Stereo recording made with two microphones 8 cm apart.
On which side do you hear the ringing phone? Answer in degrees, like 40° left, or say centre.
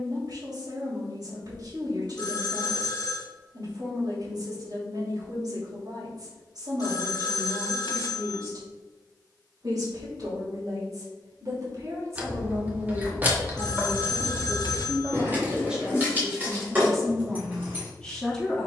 60° left.